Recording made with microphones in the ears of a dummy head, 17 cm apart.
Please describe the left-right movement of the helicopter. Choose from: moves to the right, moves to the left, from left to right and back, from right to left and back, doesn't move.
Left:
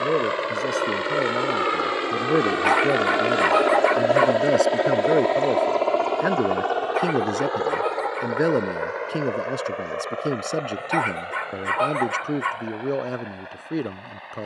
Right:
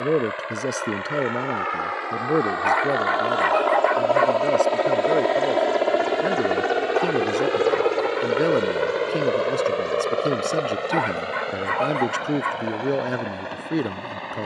moves to the right.